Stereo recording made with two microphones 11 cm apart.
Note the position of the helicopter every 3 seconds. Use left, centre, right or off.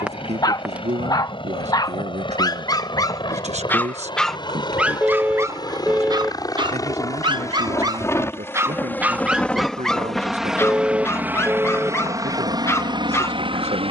left, left, left, centre, right.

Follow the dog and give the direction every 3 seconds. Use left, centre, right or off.
left, centre, right, centre, left.